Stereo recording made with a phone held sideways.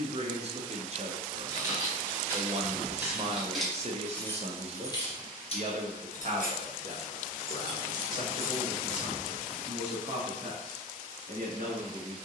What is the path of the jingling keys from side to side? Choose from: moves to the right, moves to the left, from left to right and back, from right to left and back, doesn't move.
from right to left and back.